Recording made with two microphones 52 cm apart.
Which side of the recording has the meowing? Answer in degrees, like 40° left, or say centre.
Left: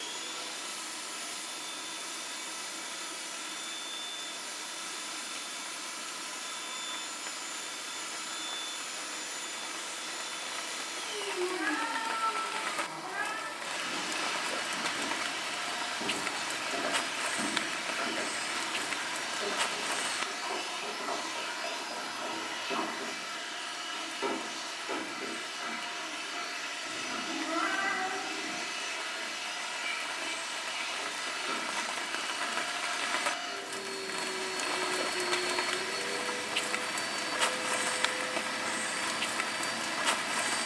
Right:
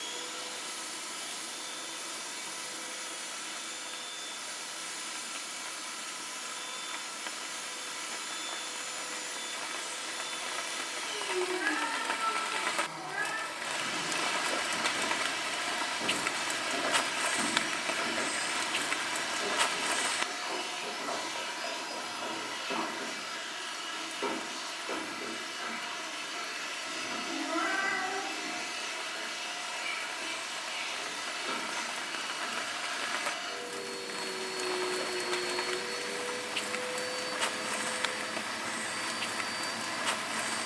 20° left.